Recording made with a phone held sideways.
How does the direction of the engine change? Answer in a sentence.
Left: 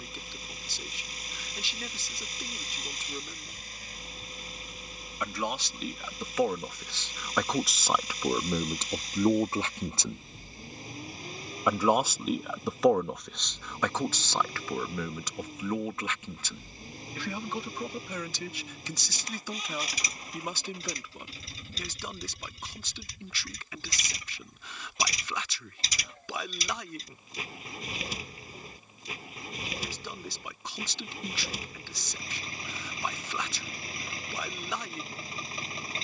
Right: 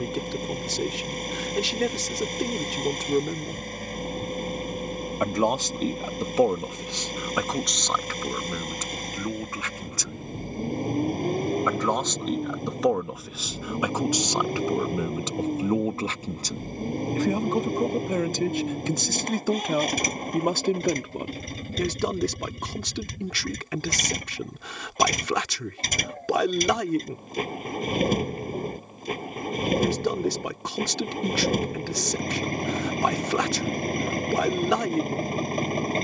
In this clip you hear the engine stay put.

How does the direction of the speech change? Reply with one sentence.
In this clip you hear the speech move from right to left and back again.